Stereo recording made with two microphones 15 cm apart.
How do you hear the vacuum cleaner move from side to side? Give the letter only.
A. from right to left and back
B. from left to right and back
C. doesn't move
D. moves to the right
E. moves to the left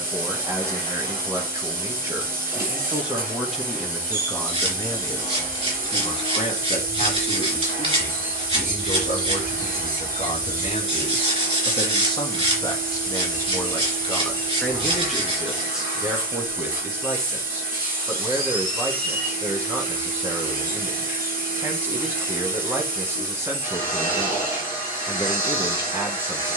C.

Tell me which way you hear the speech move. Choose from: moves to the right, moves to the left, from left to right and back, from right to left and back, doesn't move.
from right to left and back.